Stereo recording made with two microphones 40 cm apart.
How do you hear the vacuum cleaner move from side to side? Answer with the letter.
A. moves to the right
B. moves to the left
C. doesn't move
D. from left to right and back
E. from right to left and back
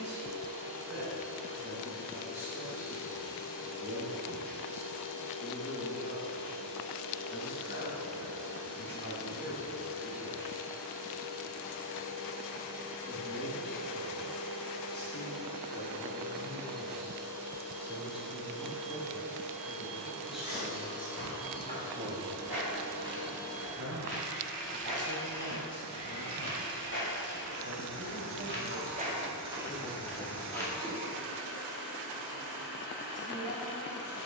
D.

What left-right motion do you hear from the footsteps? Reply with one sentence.
In this clip you hear the footsteps go from the right side to the left.